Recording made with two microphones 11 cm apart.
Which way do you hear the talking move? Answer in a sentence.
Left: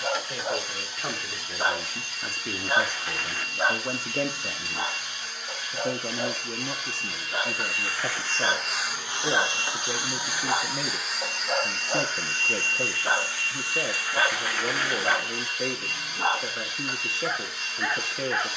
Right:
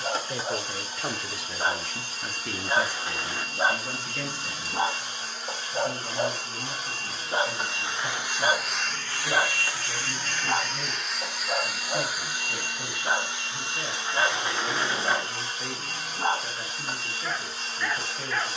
In this clip you hear the talking move to the left.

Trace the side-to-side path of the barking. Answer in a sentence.
You can hear the barking move from left to right and back again.